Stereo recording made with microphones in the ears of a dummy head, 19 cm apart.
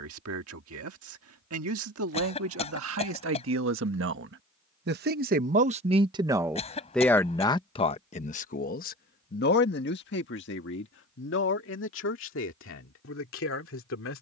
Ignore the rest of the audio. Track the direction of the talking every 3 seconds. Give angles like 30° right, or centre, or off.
70° right, 50° right, 20° left, 60° left, 70° left.